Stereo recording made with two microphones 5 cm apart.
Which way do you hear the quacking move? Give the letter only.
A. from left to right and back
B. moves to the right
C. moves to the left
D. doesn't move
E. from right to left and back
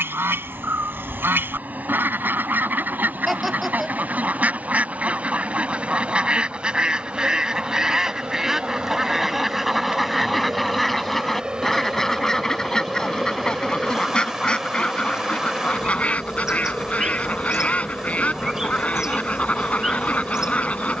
C.